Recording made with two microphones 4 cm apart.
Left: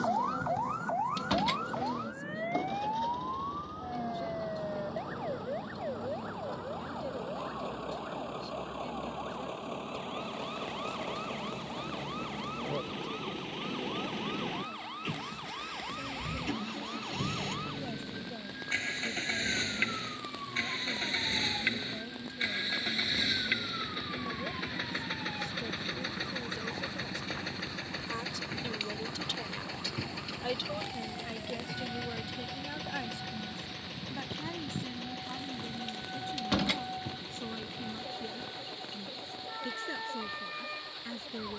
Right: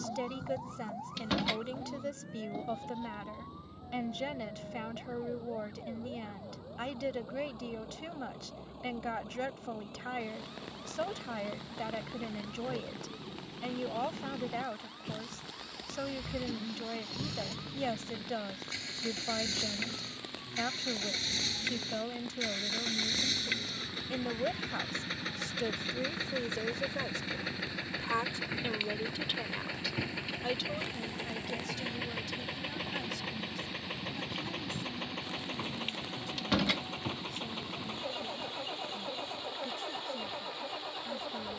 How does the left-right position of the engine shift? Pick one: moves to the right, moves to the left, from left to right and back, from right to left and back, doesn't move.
moves to the right.